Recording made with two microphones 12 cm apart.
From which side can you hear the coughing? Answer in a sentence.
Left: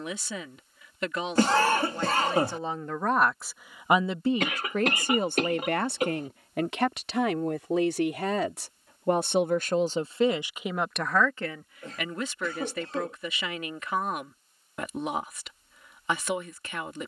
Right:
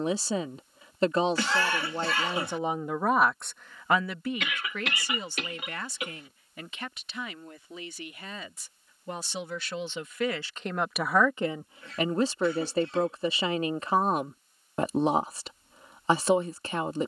In this clip you hear the coughing on the left.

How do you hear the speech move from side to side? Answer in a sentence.
In this clip you hear the speech move from right to left and back again.